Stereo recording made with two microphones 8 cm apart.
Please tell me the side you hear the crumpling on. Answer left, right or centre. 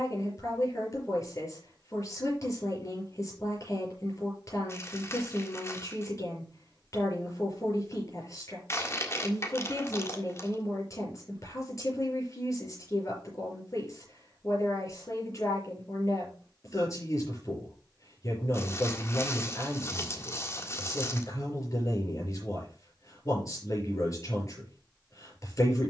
left.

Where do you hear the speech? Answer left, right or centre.
left.